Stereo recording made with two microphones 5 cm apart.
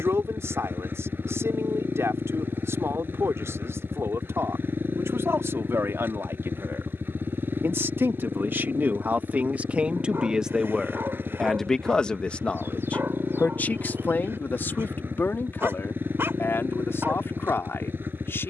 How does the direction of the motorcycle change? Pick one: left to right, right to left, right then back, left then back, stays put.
stays put.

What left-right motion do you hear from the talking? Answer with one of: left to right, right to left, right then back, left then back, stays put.
right to left.